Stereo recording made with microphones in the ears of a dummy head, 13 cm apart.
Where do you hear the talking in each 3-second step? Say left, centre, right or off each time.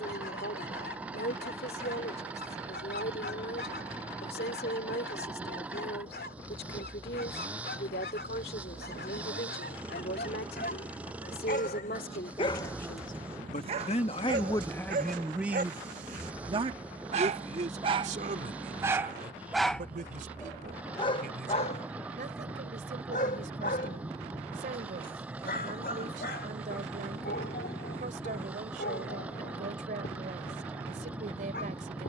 left, left, left, left, left, right, right, right, right, right, right.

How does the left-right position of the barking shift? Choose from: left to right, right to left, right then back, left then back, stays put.
right then back.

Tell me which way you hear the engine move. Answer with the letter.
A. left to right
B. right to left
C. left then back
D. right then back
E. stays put
E.